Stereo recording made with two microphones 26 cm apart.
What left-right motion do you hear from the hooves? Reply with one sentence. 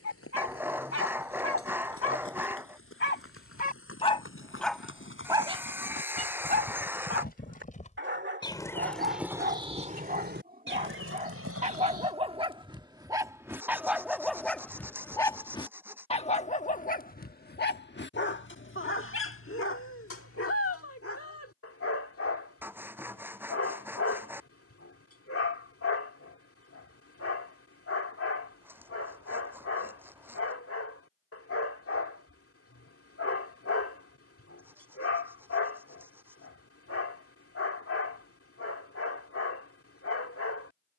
You can hear the hooves move to the right.